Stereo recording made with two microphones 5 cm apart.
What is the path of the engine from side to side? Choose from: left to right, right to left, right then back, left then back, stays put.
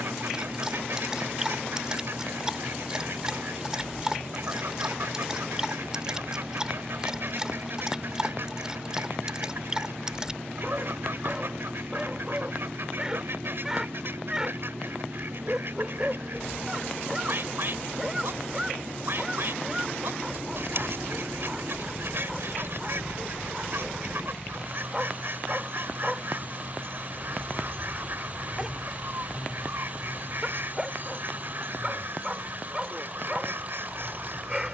stays put.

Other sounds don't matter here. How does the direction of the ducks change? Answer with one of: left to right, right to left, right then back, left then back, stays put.
stays put.